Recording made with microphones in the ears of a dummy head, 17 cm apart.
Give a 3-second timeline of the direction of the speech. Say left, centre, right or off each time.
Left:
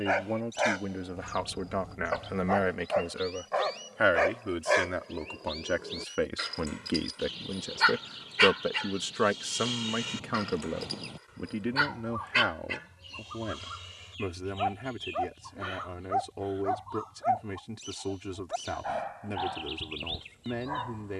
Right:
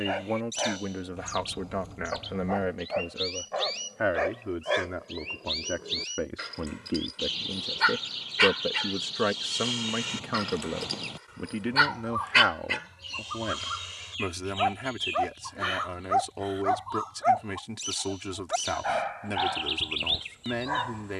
centre, left, left, centre, right, right, right.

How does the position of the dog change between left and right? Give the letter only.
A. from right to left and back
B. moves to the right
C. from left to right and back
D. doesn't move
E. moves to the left
B.